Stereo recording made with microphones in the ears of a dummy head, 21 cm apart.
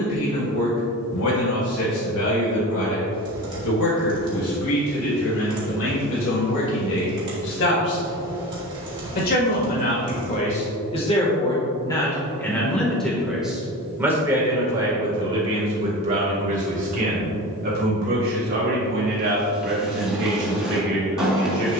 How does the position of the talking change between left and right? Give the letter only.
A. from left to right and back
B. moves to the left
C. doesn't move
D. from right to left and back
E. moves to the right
E.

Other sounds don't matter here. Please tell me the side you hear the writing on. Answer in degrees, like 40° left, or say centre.
centre.